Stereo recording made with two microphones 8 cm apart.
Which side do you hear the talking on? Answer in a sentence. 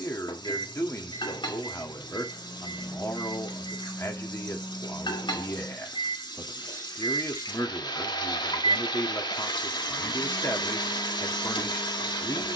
You can hear the talking on the left.